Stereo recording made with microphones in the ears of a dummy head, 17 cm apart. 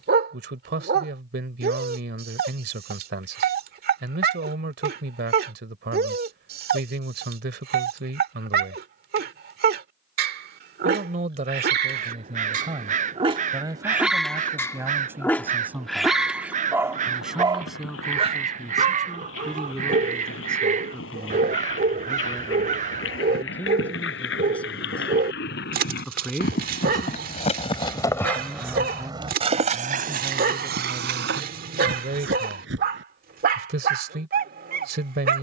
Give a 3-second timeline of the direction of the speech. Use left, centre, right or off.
right, right, right, right, right, centre, centre, centre, centre, centre, right, right.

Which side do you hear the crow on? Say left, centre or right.
right.